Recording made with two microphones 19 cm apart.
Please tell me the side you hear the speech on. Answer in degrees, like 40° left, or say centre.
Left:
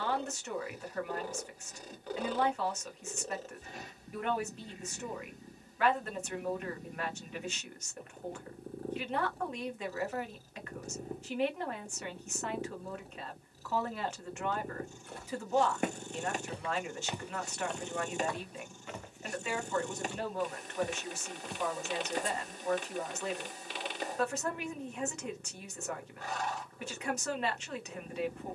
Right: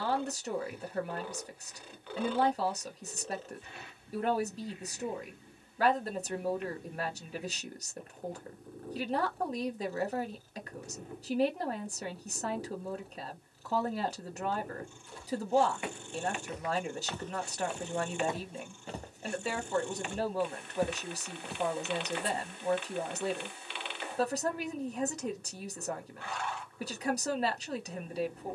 30° right.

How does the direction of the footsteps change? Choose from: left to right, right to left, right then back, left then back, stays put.
right then back.